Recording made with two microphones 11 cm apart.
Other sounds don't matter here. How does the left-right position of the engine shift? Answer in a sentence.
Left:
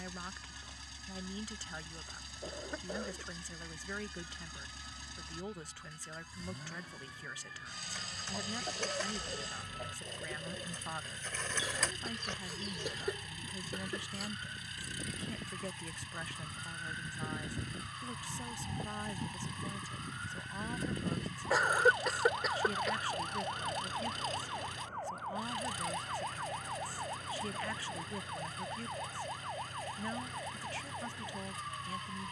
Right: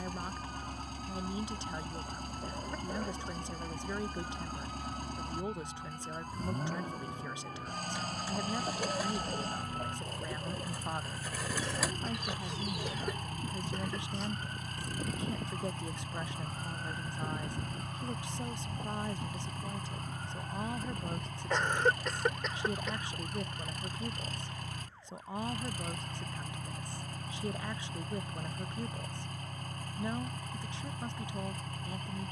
You can hear the engine stay in one place.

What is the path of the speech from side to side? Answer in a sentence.
In this clip you hear the speech stay put.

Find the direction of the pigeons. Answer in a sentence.
You can hear the pigeons in the centre.